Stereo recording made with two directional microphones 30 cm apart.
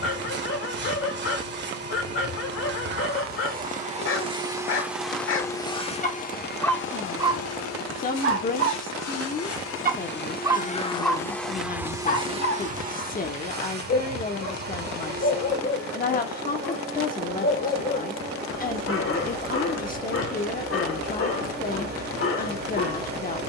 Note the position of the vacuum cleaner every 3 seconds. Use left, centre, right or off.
right, centre, left, left, right, right, right, right.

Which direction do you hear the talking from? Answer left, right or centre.
left.